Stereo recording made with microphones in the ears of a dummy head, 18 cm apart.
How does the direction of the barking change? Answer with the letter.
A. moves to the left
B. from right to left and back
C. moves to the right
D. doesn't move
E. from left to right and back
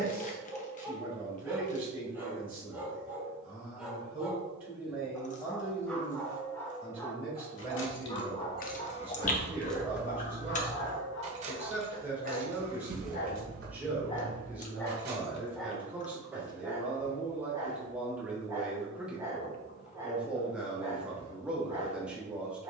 B.